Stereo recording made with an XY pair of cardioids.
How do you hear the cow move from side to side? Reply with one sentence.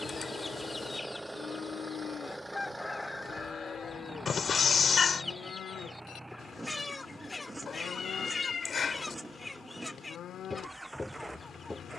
You can hear the cow stay put.